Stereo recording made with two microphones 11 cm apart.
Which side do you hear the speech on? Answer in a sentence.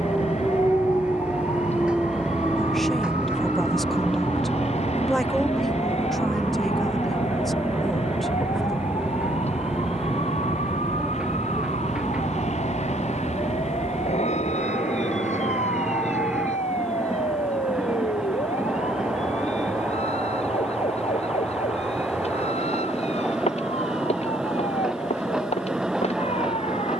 You can hear the speech in the centre.